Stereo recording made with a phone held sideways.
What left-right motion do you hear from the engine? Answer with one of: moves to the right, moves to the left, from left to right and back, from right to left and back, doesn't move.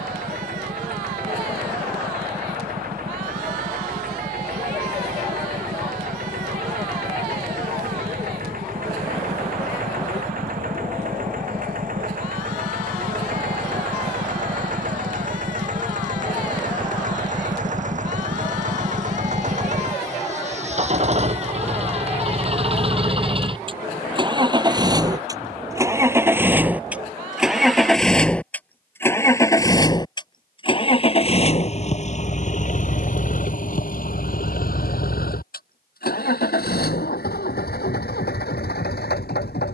moves to the left.